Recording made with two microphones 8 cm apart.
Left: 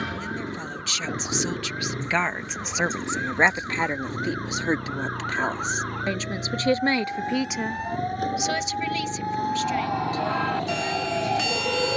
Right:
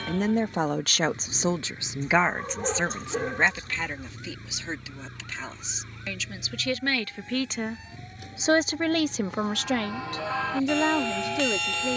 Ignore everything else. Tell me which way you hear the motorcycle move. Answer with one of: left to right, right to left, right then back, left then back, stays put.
stays put.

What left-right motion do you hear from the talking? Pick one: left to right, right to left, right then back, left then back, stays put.
left then back.